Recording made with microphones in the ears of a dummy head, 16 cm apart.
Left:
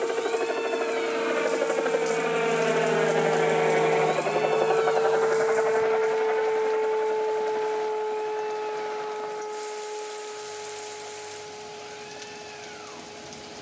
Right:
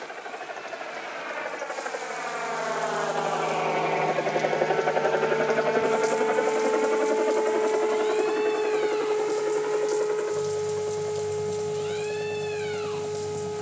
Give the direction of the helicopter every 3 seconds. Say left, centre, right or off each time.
left, centre, right, right, right.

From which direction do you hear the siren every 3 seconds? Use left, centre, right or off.
left, left, centre, right, right.